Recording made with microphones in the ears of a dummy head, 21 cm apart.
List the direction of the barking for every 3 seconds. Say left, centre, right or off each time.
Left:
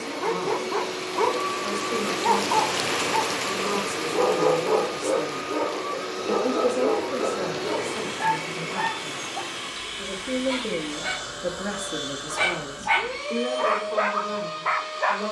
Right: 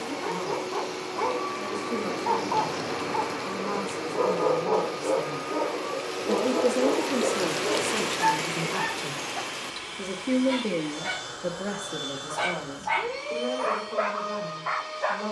left, left, centre, centre, left.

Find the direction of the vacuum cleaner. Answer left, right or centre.
left.